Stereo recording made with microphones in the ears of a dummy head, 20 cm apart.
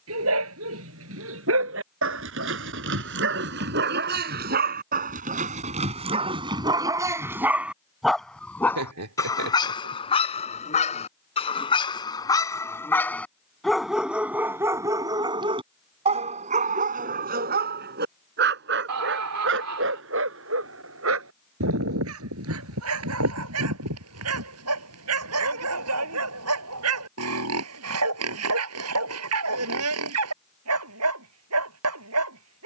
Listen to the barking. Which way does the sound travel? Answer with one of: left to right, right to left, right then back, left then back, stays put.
left then back.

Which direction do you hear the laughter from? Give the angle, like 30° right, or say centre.
70° right.